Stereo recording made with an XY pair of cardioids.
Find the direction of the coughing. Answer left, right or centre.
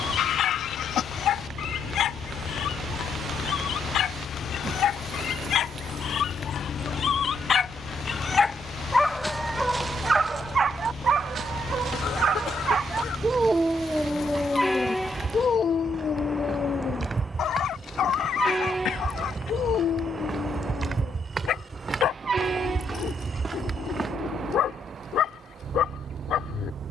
left.